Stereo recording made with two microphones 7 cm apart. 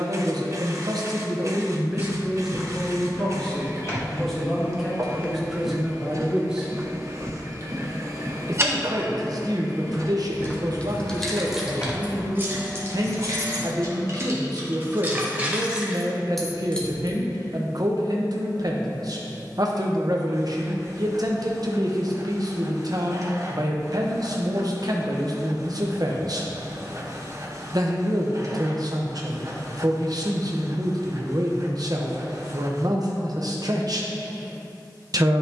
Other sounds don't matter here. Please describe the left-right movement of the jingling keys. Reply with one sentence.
In this clip you hear the jingling keys move from left to right and back again.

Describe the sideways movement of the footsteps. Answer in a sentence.
You can hear the footsteps move from left to right and back again.